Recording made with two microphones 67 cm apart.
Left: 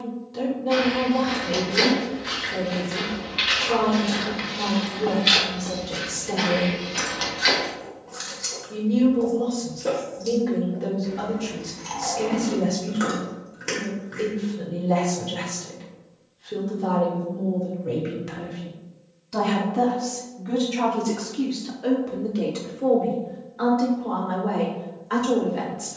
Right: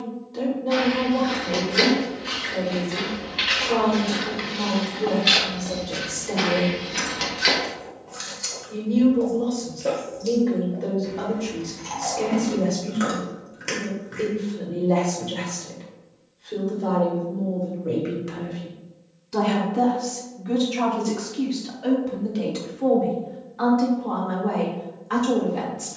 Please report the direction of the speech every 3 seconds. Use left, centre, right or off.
left, left, left, left, left, left, centre, right, right.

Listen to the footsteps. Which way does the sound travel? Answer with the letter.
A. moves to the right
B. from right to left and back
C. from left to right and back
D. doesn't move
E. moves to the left
A.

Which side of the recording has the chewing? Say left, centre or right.
centre.